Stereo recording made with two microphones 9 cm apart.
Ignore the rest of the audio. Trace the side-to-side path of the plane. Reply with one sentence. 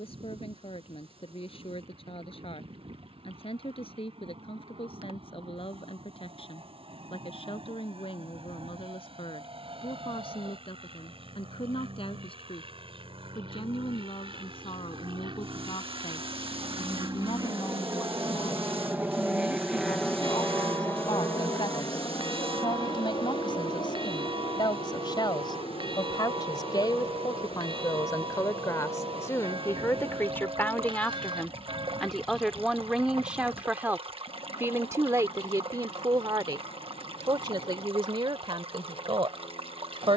You can hear the plane travel towards the left.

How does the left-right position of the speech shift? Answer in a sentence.
You can hear the speech move from left to right.